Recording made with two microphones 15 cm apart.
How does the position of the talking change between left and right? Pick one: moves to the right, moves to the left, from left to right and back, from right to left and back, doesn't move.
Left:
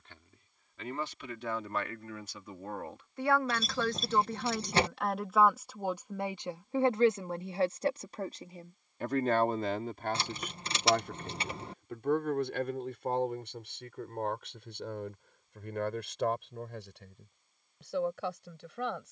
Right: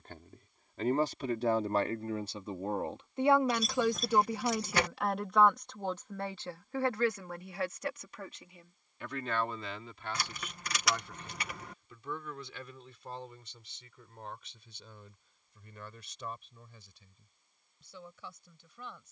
moves to the left.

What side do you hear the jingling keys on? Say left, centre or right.
left.